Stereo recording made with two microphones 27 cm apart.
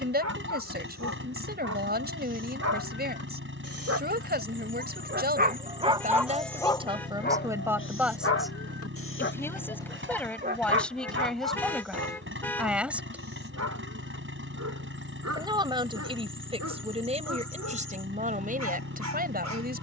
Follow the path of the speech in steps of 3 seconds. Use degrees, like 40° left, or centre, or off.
40° right, 40° right, 10° right, centre, centre, 20° right, 30° right.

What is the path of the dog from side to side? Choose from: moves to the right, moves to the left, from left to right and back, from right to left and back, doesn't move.
from right to left and back.